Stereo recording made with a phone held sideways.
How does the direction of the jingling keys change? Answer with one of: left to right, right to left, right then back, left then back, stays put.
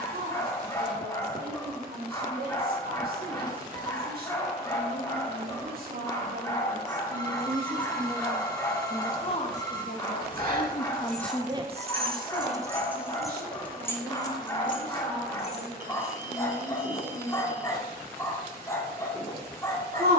right to left.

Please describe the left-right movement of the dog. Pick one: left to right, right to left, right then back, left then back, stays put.
stays put.